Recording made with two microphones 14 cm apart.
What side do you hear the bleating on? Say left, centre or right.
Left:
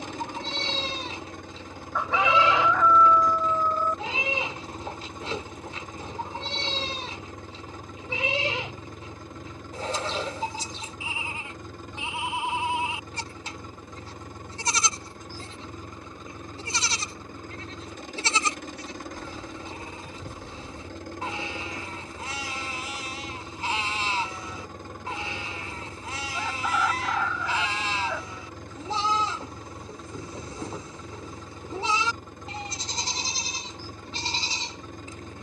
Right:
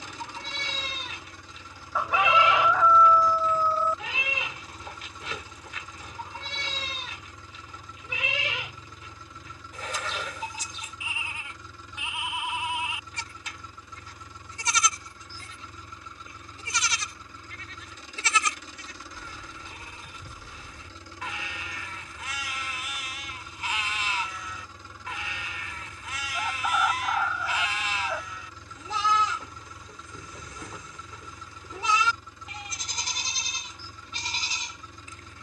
left.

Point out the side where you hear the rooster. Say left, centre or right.
centre.